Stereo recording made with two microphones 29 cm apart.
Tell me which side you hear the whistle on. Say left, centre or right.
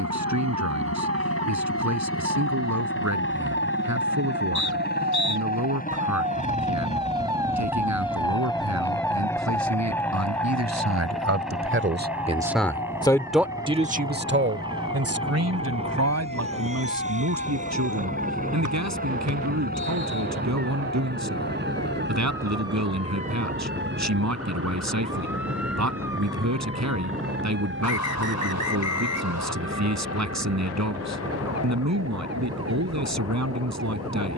left.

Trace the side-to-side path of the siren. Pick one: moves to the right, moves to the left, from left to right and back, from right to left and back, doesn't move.
moves to the left.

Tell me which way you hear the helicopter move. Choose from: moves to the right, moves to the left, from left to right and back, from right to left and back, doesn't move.
moves to the right.